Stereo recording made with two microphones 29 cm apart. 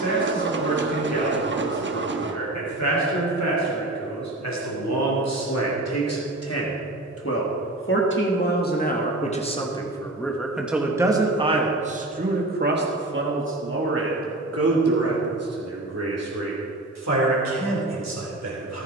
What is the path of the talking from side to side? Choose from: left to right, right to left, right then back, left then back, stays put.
left to right.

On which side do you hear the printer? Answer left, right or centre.
right.